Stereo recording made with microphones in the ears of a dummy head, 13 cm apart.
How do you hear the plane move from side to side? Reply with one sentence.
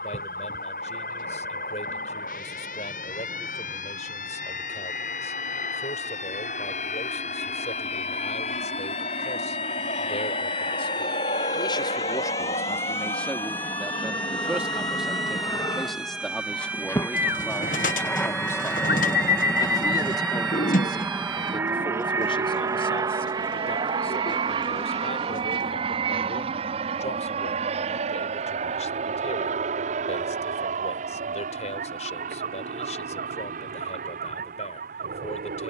In this clip you hear the plane move to the right.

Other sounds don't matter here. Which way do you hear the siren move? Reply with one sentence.
In this clip you hear the siren travel towards the right.